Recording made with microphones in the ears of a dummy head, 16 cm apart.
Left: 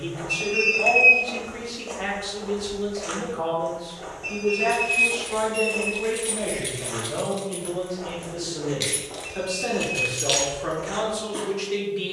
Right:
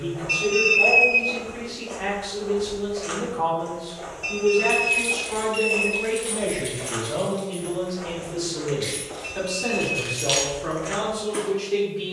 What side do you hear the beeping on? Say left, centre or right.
right.